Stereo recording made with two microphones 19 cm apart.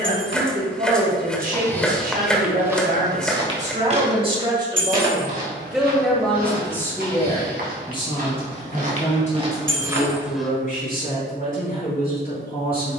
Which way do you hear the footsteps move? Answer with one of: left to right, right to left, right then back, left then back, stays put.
right then back.